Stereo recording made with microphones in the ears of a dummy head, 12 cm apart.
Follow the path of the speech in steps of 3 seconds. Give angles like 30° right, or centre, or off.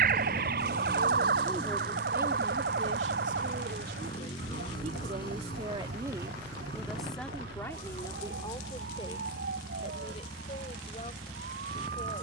10° right, 50° right, 10° left, 40° left.